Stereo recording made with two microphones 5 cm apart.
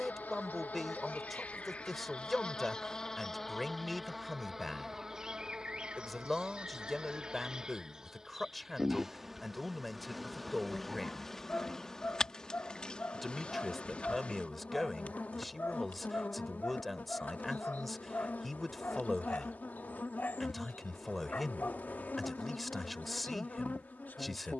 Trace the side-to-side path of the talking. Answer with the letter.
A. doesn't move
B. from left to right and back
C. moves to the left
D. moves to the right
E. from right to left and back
A.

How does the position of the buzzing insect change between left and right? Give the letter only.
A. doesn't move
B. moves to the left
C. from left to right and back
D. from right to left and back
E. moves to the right
C.